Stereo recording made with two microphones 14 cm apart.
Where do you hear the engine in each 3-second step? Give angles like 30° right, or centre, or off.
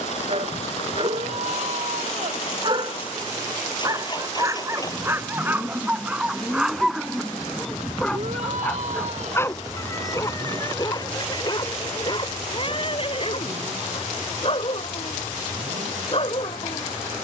50° left, 30° left, centre, 30° right, 50° right, 60° right.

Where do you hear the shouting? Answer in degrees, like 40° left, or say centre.
60° right.